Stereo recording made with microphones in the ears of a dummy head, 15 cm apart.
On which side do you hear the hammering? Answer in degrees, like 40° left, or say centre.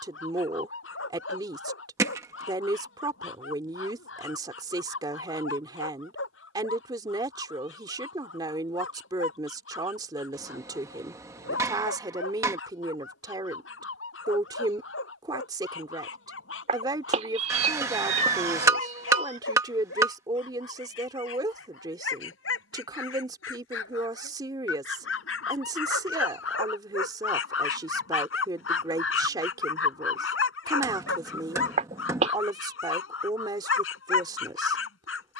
20° right.